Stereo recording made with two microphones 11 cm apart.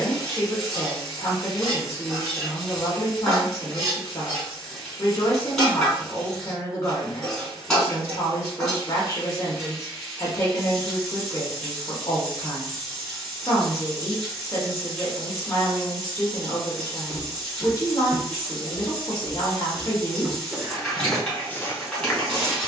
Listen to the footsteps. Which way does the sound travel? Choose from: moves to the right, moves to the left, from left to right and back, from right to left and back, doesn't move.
from left to right and back.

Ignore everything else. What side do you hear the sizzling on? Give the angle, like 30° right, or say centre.
centre.